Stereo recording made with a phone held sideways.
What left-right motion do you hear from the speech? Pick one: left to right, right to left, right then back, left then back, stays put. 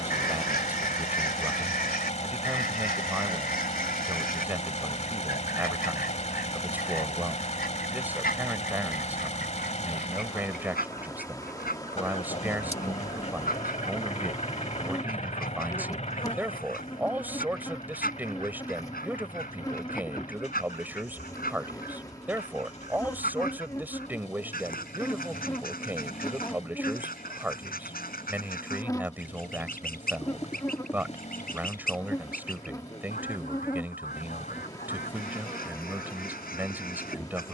stays put.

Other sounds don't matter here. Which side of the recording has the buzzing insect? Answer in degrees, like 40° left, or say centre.
20° left.